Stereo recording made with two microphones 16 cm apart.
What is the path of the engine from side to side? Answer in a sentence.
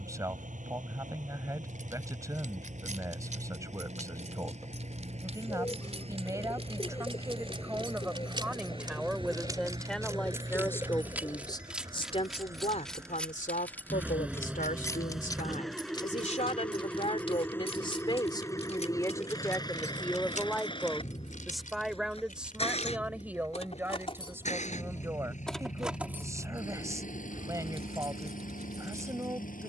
You can hear the engine travel towards the left.